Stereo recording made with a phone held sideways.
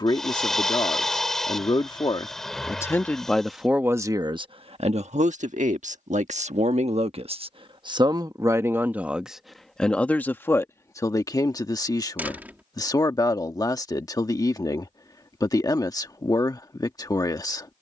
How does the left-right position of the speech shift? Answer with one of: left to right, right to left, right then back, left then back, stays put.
right then back.